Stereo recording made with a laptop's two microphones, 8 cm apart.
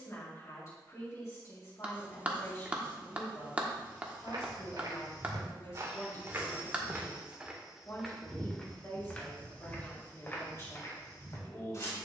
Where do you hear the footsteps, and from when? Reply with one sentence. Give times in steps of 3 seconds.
In this clip you hear the footsteps not at all from 0 s, on the right from 3 s, in the centre from 6 s and on the left from 9 s.